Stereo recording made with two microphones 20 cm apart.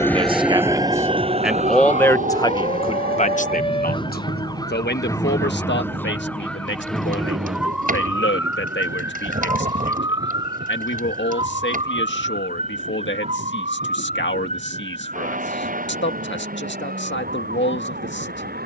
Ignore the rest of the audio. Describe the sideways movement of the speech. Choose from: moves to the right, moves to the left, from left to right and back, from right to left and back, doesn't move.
moves to the left.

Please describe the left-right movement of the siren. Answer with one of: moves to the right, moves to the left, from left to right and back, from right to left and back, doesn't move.
moves to the right.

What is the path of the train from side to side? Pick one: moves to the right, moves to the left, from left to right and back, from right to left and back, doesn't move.
moves to the right.